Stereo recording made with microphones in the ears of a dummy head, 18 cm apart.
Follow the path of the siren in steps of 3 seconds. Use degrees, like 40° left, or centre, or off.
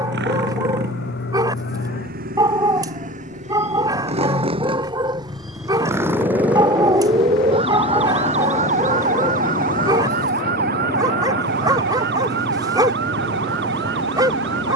60° left, 20° left, 30° right, 50° right, 60° right.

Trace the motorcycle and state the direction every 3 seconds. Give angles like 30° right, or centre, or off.
50° right, 30° right, centre, 30° left, 40° left.